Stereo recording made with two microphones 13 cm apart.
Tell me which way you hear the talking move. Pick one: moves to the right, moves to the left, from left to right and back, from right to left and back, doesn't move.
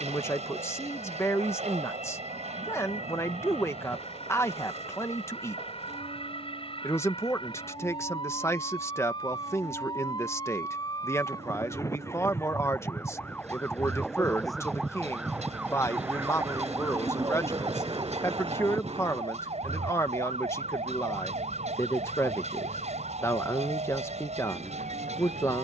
doesn't move.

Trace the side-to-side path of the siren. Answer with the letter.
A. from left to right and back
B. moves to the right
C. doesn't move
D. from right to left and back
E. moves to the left
B.